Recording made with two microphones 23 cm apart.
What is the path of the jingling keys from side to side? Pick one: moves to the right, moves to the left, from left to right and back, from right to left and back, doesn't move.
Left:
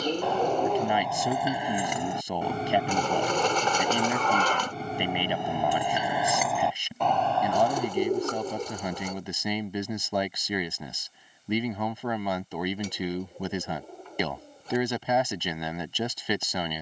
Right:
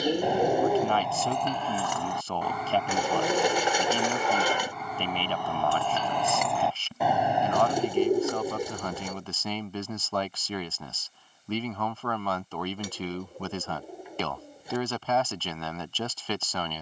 from right to left and back.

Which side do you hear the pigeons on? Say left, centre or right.
centre.